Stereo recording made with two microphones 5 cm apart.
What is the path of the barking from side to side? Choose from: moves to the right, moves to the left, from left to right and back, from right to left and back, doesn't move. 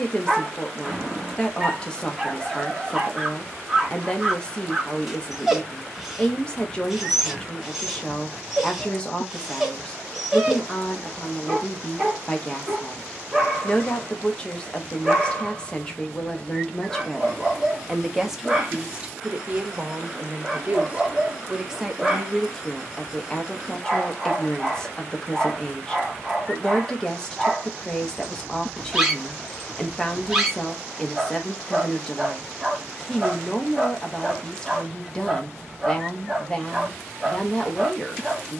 doesn't move.